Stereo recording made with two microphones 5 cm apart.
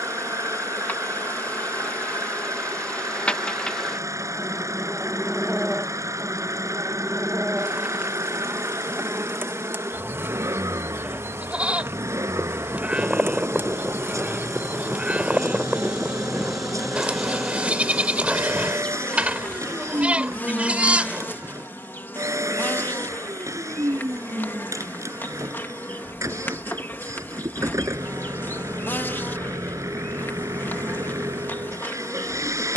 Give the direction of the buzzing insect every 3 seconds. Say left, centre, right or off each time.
left, centre, right, right, right, centre, left, left, left, left, left.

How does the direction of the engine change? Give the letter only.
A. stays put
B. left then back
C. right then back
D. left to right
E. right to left
A.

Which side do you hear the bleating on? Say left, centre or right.
right.